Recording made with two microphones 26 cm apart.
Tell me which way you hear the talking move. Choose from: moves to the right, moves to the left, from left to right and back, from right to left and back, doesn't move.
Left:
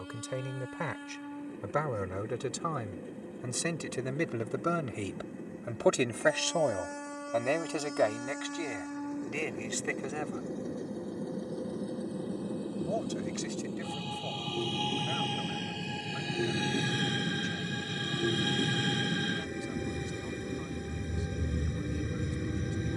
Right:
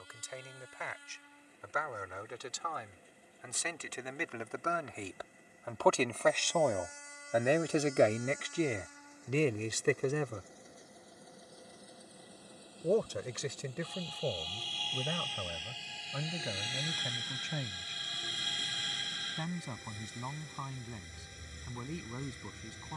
moves to the right.